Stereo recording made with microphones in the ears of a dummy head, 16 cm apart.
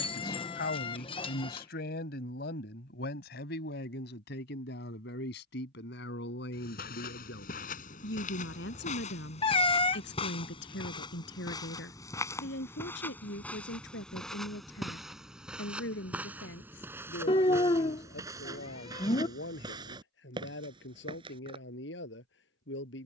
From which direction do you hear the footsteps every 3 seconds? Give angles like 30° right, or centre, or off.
off, off, 50° left, 30° left, 10° left, 10° right, 20° right, 30° right.